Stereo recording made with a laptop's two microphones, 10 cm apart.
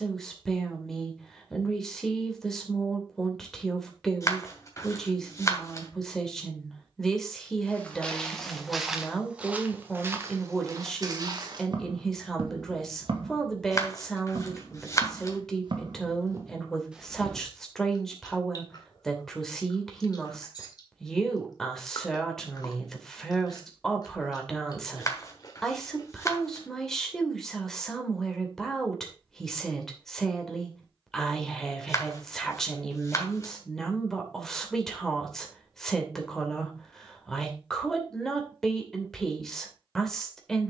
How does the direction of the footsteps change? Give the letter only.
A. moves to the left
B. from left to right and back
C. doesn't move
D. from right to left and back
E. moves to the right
B.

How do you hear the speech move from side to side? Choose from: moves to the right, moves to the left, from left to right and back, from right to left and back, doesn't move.
doesn't move.